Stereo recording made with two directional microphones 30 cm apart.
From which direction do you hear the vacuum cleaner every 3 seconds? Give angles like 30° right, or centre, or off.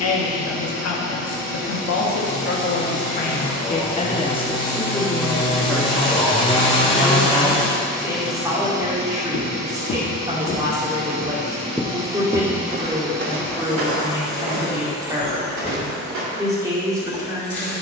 30° left, 30° left, centre, 30° right, 10° left, 20° left.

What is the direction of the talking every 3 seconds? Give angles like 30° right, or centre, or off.
50° left, 20° left, 10° right, 10° right, 10° right, 10° right.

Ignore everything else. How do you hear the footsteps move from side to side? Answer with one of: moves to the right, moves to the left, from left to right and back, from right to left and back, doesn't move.
moves to the right.